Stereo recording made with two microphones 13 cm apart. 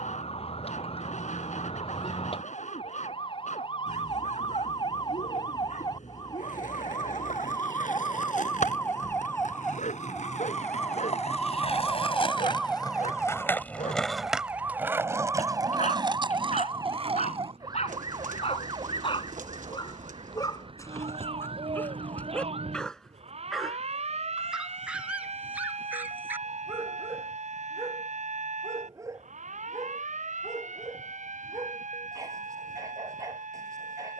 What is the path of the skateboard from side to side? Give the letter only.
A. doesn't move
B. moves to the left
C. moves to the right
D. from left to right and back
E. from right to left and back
C.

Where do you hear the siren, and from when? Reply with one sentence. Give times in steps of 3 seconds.
In this clip you hear the siren on the left from 0 s, in the centre from 9 s and on the right from 15 s.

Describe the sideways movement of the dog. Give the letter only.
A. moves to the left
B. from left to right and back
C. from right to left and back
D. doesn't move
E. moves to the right
E.